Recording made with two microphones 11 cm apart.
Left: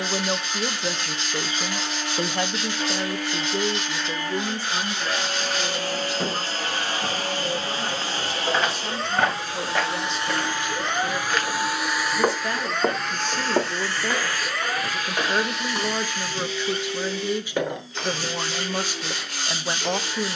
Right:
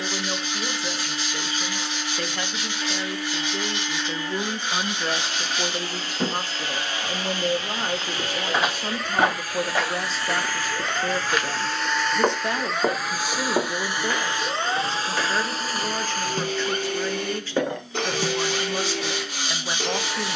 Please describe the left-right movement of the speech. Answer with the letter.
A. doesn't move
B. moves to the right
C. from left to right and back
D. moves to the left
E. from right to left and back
C.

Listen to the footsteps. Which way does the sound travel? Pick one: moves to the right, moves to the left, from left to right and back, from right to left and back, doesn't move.
moves to the left.